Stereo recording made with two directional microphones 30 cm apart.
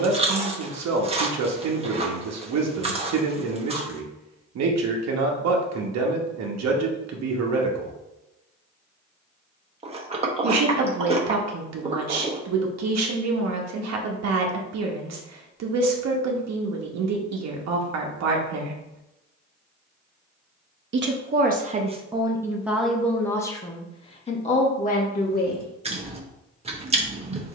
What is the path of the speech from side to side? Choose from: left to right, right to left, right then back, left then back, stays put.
right to left.